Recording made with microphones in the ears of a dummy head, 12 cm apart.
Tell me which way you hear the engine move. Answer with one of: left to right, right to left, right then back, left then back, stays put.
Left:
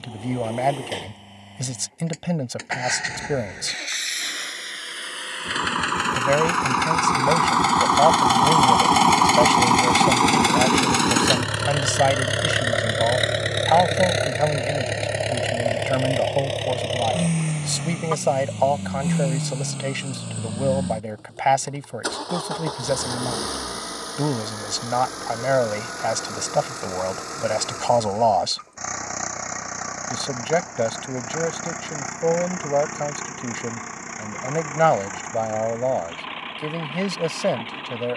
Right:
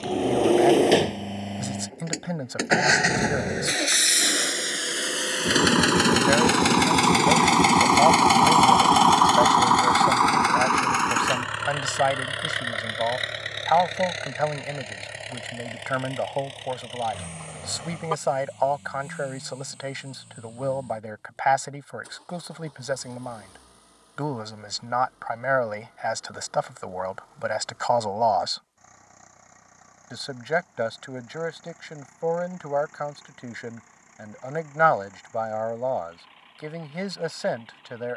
right to left.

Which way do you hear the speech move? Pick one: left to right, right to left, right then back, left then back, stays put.
stays put.